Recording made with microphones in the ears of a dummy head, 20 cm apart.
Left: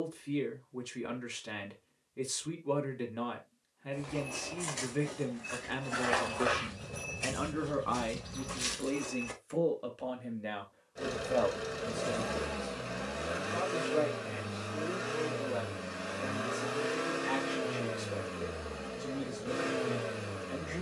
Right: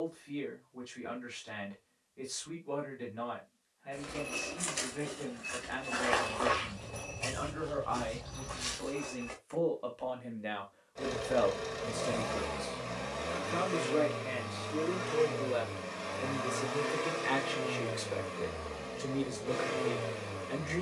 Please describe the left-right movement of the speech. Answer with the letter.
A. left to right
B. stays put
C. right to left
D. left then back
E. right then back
A.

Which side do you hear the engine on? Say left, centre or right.
centre.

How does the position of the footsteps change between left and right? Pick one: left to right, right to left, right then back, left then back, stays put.
right to left.